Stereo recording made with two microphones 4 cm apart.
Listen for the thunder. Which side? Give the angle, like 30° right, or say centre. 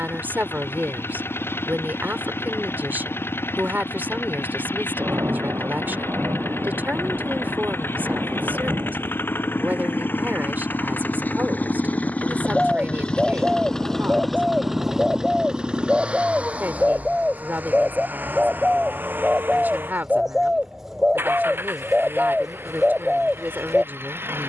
80° right.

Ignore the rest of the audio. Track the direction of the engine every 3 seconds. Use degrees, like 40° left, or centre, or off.
80° left, 80° left, 70° left, 60° left, 20° left, 30° right, 60° right, 70° right.